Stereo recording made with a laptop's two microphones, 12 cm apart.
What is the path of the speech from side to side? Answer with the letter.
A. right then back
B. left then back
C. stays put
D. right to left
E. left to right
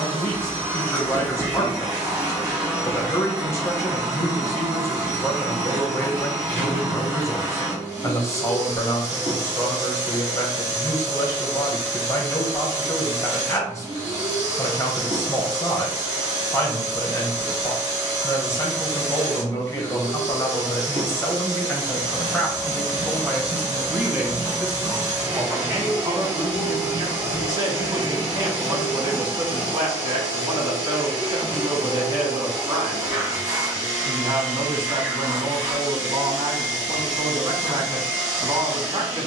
E.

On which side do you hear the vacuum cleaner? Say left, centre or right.
right.